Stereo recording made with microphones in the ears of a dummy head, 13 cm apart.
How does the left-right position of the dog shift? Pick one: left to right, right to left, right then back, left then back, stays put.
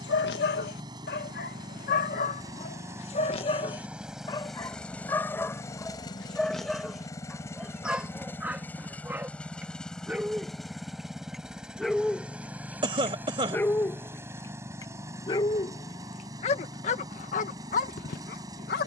right then back.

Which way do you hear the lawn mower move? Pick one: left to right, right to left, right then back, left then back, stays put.
left then back.